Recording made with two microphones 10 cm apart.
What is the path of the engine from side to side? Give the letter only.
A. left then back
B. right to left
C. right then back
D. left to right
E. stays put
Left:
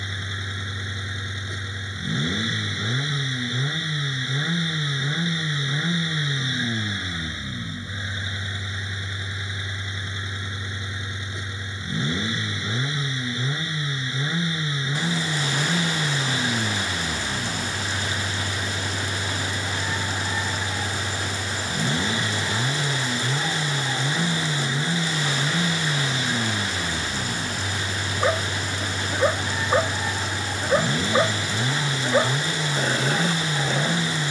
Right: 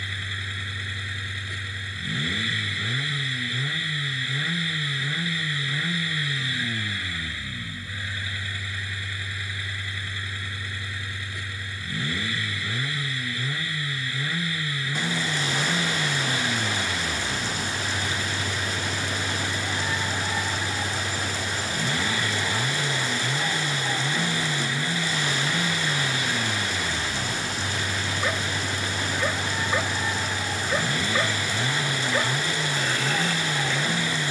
E.